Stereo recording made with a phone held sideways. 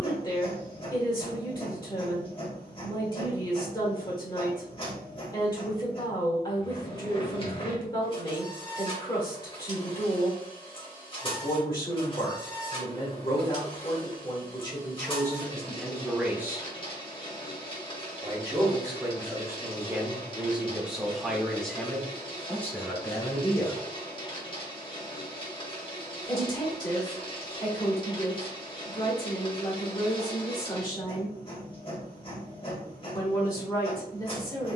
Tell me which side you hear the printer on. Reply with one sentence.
You can hear the printer on the left.